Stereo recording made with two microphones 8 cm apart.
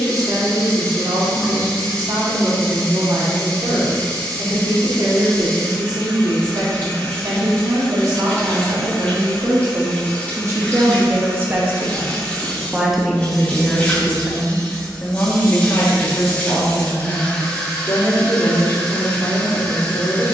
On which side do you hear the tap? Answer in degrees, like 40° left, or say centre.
20° left.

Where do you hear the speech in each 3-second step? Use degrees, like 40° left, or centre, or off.
70° right, 70° right, 70° right, 40° right, centre, 40° left, 50° left.